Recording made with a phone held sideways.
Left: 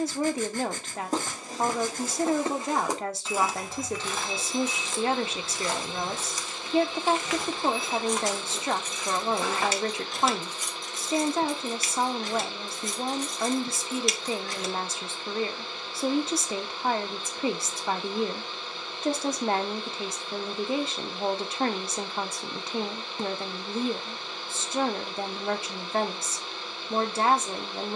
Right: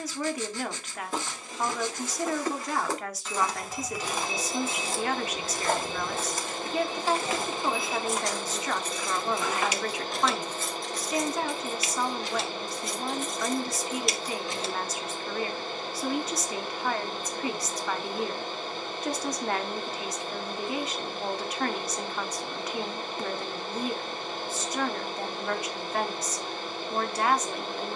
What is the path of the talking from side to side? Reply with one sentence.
You can hear the talking stay in one place.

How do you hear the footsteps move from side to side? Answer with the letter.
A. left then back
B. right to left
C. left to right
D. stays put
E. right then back
E.